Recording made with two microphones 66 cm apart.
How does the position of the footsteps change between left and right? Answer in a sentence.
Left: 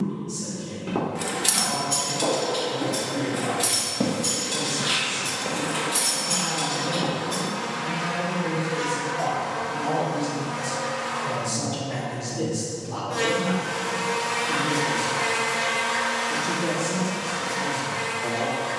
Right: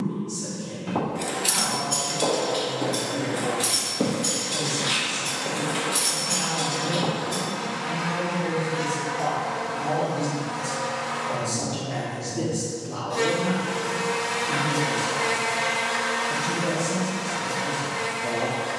You can hear the footsteps move from right to left and back again.